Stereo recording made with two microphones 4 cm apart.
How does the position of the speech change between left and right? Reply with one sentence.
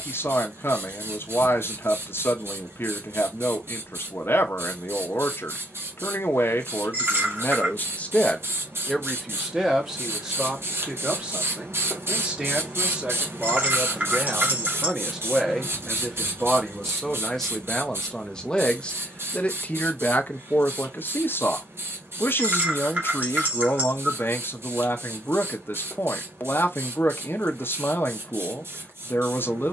You can hear the speech go right and come back.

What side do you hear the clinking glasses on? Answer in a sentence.
In this clip you hear the clinking glasses on the right.